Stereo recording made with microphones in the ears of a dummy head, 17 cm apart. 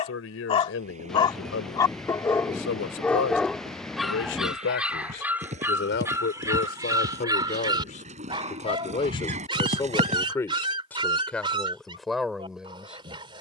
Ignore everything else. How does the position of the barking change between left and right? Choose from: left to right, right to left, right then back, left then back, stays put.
left to right.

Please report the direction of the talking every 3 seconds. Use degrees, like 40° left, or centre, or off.
80° left, 70° left, 40° left, 10° left, centre.